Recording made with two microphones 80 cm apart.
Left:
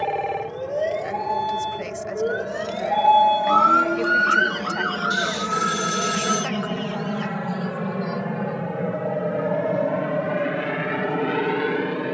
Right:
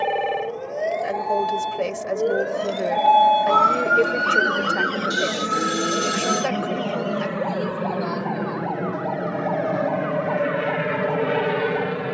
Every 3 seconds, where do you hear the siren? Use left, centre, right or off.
left, right, right, right.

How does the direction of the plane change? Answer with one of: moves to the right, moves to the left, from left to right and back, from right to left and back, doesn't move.
moves to the right.